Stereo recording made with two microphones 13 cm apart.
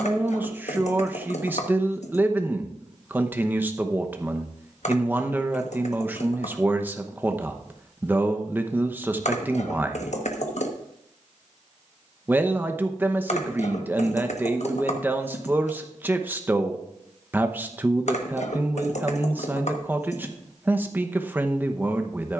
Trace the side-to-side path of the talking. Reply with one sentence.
In this clip you hear the talking stay in one place.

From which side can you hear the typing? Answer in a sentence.
You can hear the typing on the left.